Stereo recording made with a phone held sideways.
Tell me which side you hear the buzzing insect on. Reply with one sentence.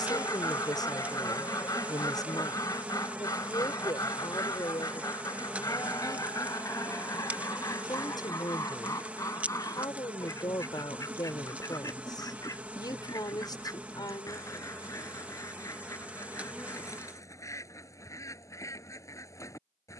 In this clip you hear the buzzing insect in the centre.